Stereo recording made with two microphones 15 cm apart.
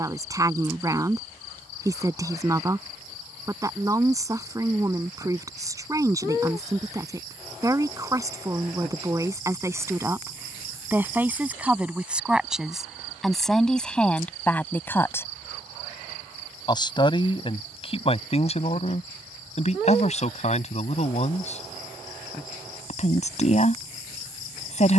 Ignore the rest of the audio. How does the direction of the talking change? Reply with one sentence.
You can hear the talking travel towards the left.